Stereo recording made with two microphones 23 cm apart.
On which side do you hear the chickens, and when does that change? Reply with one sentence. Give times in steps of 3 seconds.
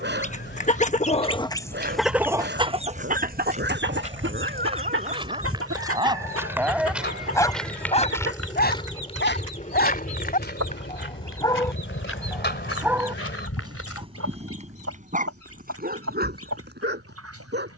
You can hear the chickens in the centre from 0 s and on the right from 3 s.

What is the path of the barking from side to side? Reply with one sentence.
You can hear the barking move from right to left and back again.